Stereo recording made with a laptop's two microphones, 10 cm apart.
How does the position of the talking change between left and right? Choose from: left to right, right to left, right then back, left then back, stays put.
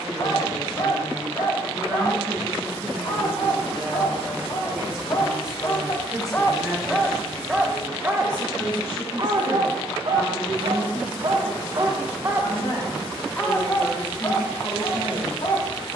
right to left.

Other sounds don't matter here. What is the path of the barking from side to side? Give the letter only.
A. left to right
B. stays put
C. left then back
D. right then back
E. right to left
D.